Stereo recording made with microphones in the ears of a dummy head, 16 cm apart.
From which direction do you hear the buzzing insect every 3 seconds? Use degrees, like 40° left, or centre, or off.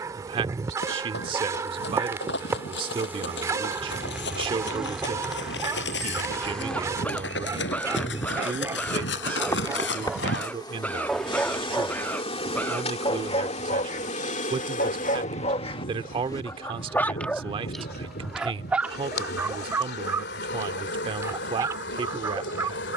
20° right, centre, 10° left, 20° left, 40° left, 50° left, 60° left, 70° left.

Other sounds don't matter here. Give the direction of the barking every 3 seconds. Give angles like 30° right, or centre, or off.
20° right, 20° right, 20° right, centre, 40° left, 20° left, 10° right, 20° right.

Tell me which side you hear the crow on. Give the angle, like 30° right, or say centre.
10° left.